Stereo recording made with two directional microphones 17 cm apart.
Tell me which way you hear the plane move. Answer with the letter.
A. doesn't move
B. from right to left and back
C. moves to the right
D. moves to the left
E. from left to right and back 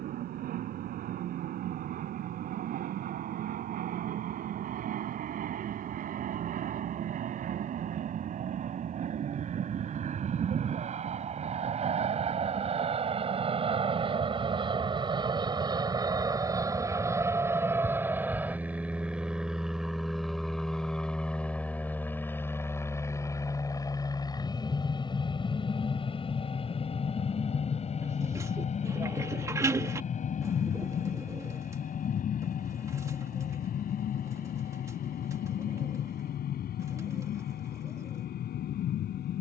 D.